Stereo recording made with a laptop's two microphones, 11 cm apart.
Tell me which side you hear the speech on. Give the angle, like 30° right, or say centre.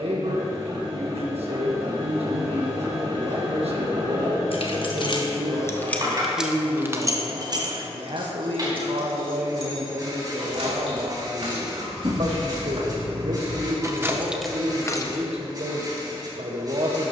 70° right.